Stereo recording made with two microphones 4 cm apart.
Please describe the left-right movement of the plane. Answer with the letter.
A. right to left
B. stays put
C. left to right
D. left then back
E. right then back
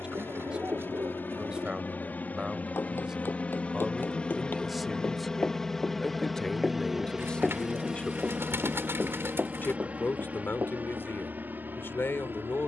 C.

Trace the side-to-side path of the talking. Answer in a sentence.
In this clip you hear the talking move to the left.